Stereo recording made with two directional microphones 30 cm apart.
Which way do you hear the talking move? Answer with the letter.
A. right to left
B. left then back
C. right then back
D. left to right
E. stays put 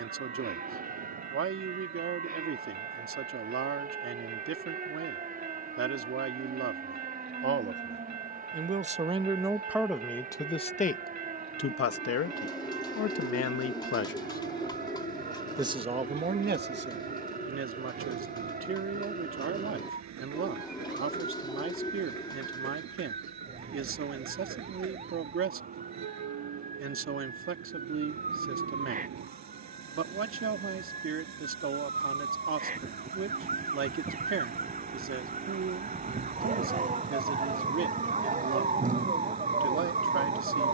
B.